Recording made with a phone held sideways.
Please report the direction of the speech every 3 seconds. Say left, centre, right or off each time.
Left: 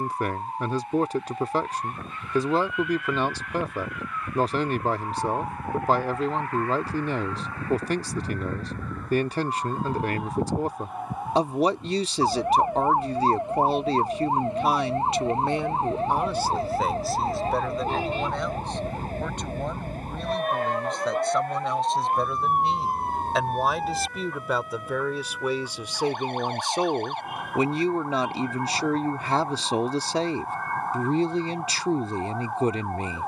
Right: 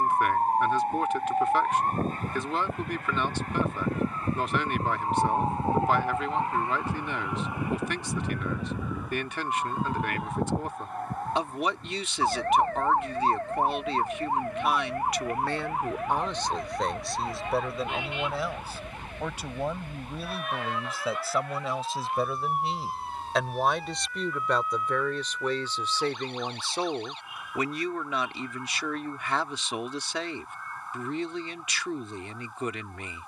left, left, left, left, left, centre, centre, centre, centre, left, left.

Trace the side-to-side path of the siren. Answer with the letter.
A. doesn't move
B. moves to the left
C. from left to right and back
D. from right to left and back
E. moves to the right
B.